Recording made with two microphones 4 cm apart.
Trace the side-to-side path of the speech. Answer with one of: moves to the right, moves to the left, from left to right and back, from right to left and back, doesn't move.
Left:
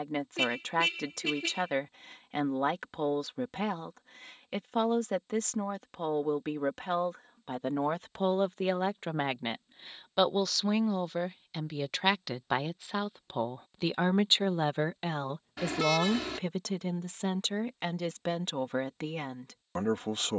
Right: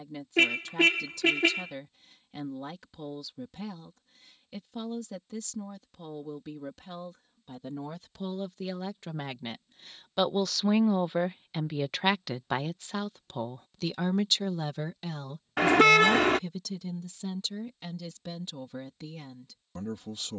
from left to right and back.